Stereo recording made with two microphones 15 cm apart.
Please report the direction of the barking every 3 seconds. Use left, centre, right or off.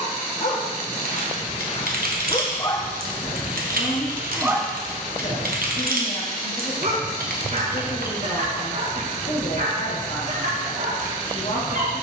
left, centre, right, right.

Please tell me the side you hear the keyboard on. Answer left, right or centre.
right.